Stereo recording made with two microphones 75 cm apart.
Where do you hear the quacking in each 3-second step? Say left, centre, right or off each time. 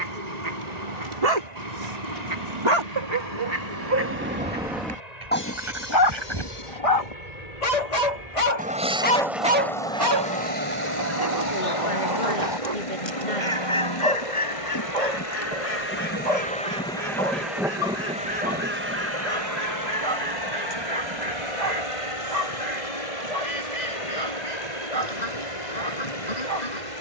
right, right, right, centre, left, left, left, left, left.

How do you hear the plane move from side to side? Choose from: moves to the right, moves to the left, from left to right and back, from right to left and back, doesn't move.
moves to the right.